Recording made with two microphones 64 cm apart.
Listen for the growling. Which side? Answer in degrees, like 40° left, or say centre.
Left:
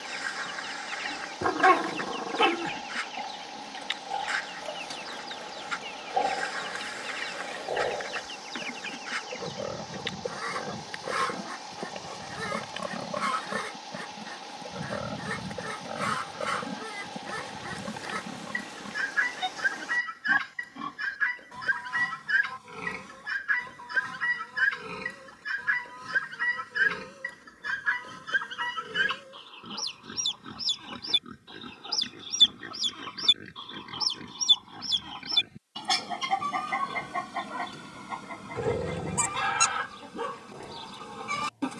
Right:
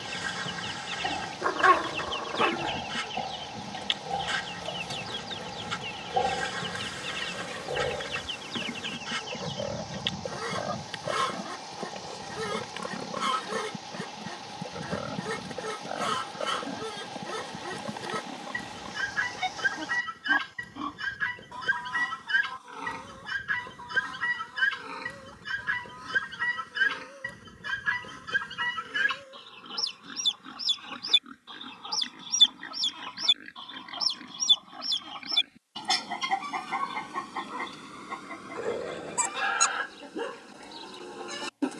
50° left.